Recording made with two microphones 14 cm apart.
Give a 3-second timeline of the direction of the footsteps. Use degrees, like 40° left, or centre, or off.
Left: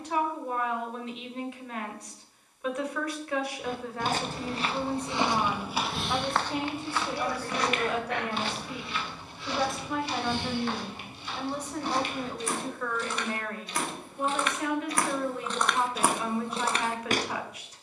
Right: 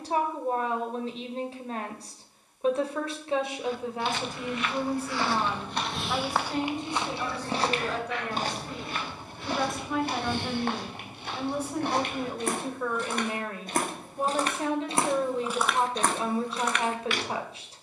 off, 30° left, 30° right, 50° right, 50° right, 10° left.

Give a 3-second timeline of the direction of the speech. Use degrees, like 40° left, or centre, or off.
30° right, 10° right, 10° left, centre, 20° right, 30° right.